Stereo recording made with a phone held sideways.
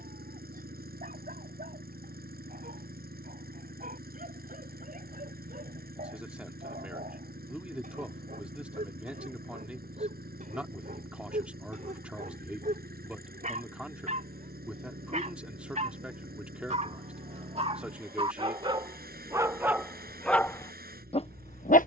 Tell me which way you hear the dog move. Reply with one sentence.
In this clip you hear the dog move from right to left.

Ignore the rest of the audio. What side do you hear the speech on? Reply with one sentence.
In this clip you hear the speech in the centre.